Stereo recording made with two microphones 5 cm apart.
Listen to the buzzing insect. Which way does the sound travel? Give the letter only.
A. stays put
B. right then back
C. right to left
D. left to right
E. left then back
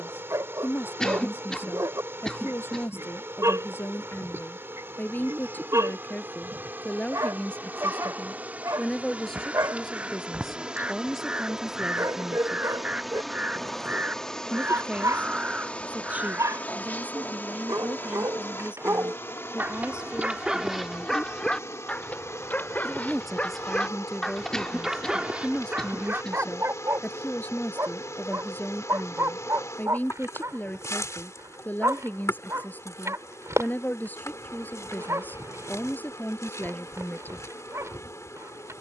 C.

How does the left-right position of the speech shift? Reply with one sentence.
You can hear the speech move from left to right and back again.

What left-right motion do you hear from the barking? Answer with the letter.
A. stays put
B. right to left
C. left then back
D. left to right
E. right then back
C.